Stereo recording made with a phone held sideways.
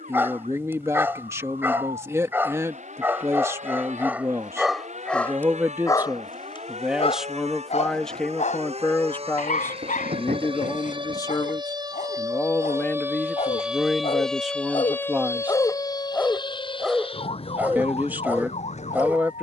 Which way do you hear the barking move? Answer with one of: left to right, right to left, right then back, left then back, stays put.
left then back.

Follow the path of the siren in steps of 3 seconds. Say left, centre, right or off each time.
right, right, right, right, centre, left, left.